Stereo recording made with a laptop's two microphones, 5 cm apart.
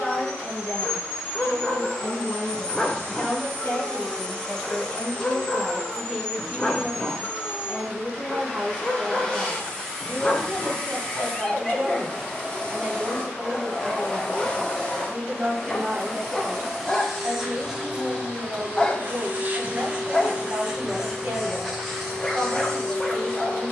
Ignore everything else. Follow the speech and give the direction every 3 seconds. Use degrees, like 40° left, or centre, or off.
50° left, 20° left, 10° right, 40° right, 50° right, 50° right, 50° right, 50° right.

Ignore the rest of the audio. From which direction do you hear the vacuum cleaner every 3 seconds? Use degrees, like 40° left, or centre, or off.
10° left, 10° left, 10° left, 10° left, 10° left, centre, 20° right, centre.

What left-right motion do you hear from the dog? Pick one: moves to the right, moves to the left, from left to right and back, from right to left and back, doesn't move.
doesn't move.